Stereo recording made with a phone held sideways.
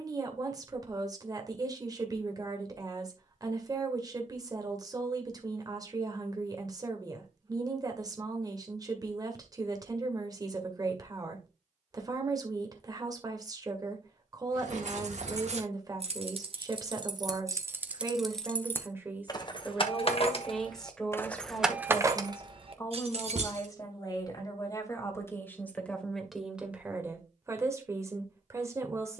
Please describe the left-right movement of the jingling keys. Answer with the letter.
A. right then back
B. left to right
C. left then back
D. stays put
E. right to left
C.